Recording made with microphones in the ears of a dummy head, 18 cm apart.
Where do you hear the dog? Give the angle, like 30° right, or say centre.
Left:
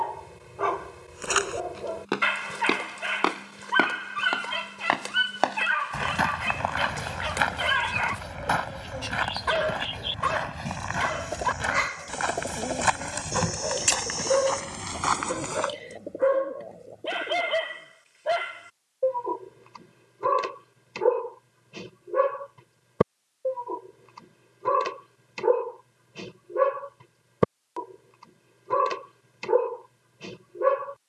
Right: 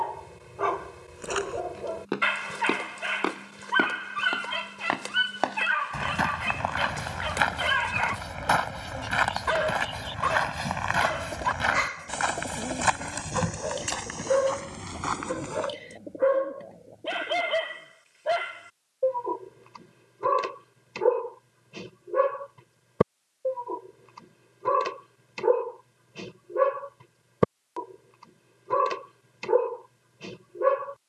centre.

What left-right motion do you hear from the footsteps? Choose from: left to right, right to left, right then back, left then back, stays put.
right then back.